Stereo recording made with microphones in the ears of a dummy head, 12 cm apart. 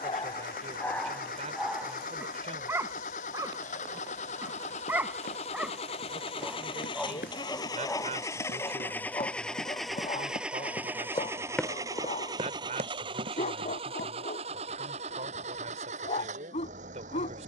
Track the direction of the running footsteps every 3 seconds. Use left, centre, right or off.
off, left, left, left, right, off.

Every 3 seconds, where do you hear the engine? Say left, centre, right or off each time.
left, left, left, centre, right, right.